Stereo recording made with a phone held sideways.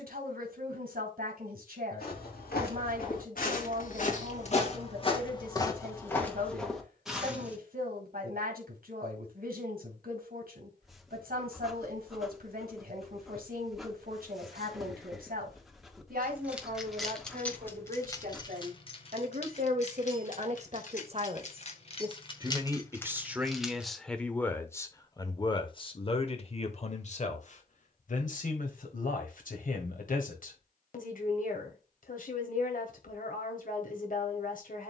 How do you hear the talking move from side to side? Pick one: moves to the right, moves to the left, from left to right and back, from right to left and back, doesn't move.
moves to the left.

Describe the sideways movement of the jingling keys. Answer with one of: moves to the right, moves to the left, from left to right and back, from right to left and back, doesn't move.
from right to left and back.